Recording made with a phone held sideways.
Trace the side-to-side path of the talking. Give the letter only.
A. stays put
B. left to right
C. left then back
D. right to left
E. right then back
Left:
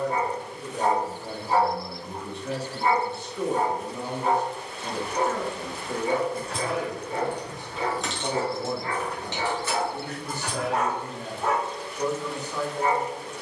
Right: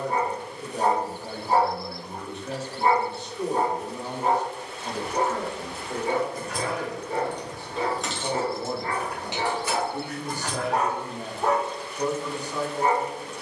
C.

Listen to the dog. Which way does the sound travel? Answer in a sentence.
In this clip you hear the dog stay put.